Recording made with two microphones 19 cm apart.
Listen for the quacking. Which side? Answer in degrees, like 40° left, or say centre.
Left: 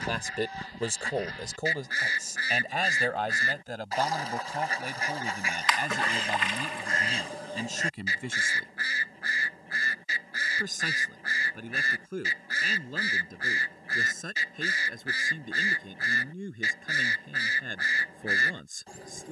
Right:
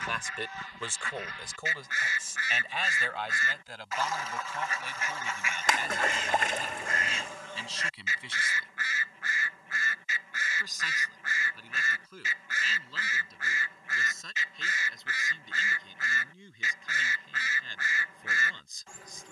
30° left.